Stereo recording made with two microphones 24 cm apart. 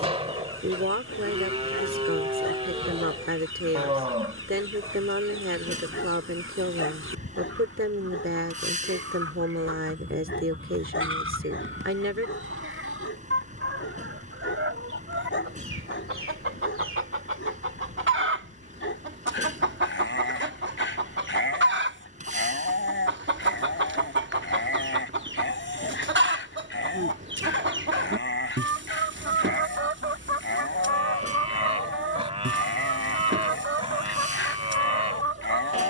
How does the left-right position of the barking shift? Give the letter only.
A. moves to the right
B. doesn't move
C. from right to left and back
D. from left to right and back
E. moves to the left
B.